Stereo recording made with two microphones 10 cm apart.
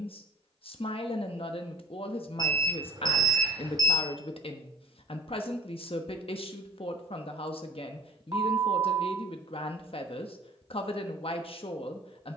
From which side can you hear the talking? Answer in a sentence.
You can hear the talking on the left.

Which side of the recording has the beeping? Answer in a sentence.
In this clip you hear the beeping on the right.